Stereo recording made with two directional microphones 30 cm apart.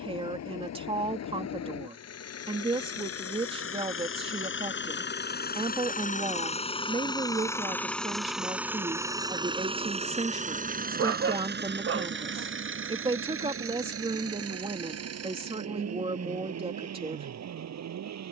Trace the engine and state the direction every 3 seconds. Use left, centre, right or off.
left, left, centre, right, right, right.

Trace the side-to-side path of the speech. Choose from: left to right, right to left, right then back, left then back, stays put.
stays put.